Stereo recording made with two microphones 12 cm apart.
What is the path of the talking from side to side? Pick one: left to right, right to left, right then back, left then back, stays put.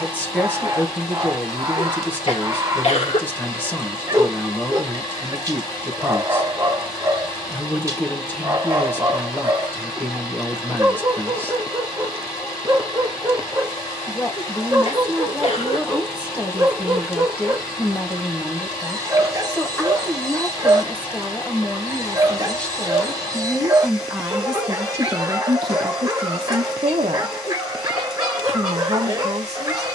left to right.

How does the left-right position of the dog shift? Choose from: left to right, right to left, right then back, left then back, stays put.
stays put.